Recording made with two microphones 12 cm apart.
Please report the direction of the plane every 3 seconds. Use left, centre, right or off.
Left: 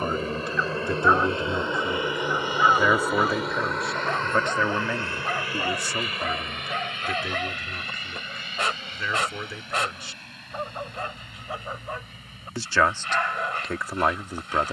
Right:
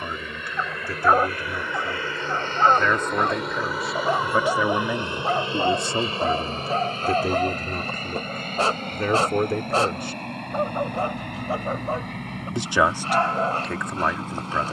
left, centre, right, right, right.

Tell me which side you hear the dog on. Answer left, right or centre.
right.